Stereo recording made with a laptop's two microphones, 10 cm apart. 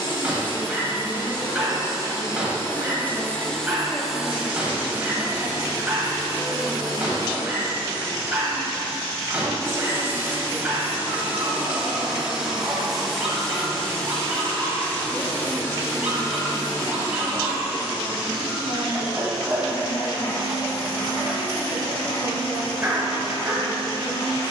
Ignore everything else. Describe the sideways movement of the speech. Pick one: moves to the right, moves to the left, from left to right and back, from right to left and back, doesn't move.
from left to right and back.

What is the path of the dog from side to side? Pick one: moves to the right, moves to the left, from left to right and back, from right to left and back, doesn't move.
doesn't move.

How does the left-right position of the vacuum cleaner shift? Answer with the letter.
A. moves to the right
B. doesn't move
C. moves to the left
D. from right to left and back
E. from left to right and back
E.